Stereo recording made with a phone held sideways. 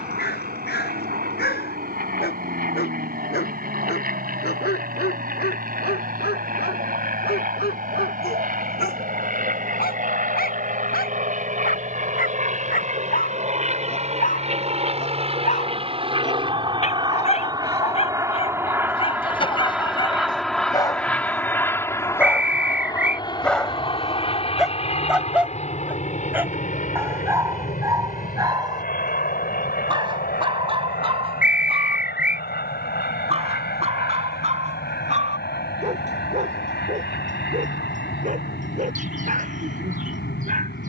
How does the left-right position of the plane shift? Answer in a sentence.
In this clip you hear the plane go from the right side to the left.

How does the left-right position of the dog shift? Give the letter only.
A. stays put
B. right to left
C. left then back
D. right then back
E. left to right
E.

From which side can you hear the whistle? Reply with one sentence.
You can hear the whistle in the centre.